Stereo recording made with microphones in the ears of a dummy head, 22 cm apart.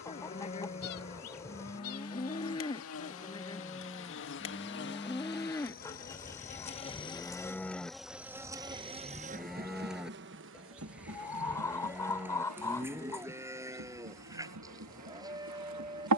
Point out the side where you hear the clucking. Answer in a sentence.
You can hear the clucking in the centre.